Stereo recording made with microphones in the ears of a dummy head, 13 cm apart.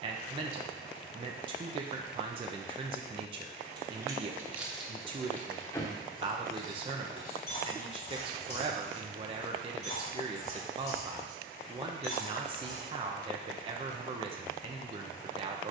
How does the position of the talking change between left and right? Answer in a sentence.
In this clip you hear the talking stay put.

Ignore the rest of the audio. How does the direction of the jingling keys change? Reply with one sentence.
In this clip you hear the jingling keys move from right to left.